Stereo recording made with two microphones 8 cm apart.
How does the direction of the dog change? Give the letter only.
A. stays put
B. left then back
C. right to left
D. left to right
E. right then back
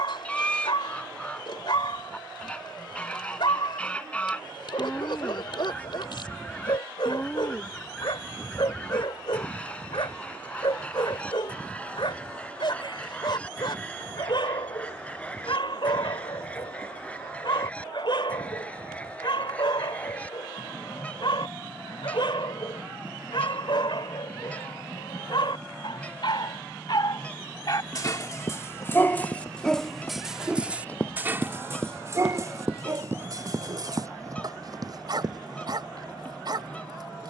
D.